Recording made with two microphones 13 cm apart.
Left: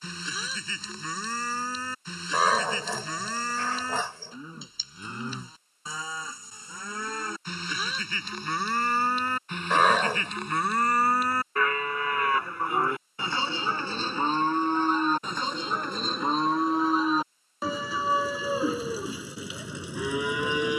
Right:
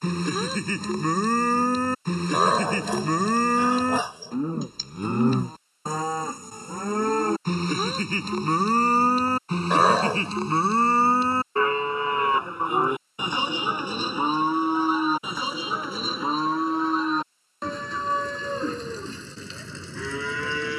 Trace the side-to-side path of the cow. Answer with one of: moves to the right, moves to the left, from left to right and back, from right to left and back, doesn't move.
moves to the left.